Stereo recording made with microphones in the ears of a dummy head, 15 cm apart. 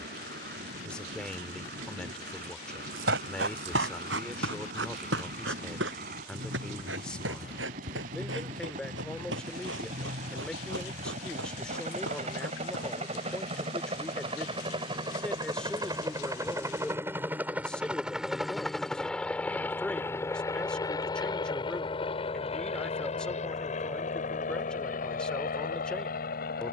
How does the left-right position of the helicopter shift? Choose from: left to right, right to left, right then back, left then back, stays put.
right to left.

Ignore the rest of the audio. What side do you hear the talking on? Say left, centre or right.
centre.